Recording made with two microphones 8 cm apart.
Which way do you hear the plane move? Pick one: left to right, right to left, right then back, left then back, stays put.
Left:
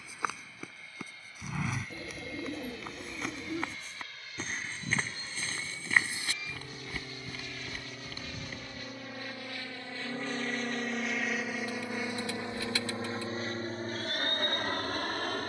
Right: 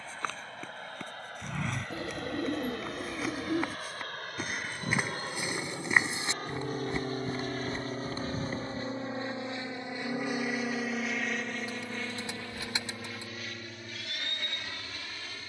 right to left.